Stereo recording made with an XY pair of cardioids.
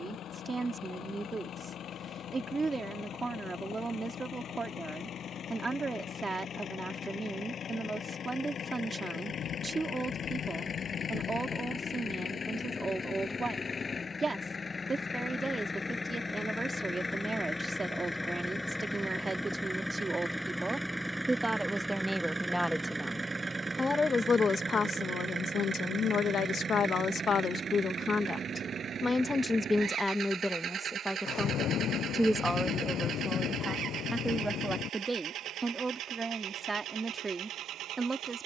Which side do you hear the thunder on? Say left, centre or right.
left.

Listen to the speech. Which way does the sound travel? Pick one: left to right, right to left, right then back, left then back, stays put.
left then back.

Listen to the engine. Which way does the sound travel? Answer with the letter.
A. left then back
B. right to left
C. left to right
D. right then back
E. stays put
C.